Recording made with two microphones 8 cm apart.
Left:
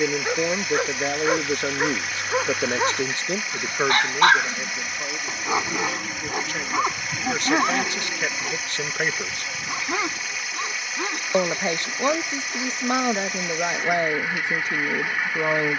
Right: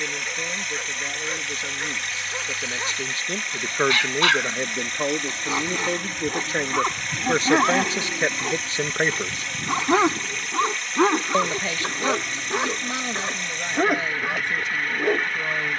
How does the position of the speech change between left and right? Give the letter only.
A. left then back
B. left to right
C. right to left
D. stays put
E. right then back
E.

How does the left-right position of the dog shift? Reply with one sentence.
In this clip you hear the dog move to the right.